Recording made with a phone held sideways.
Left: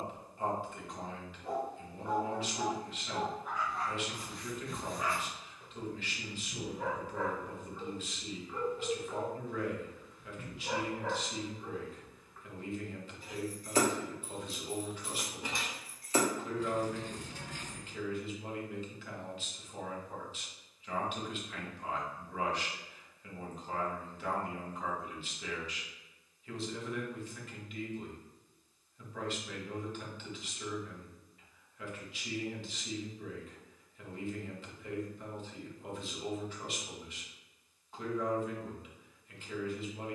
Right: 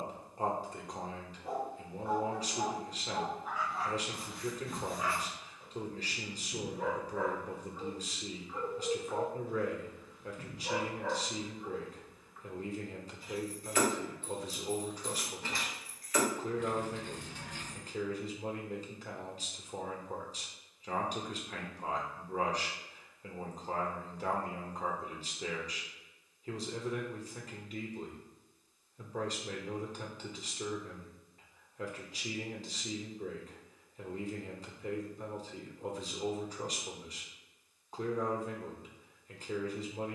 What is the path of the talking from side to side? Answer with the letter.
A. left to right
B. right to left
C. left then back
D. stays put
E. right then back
D.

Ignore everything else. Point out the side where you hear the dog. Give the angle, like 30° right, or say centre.
centre.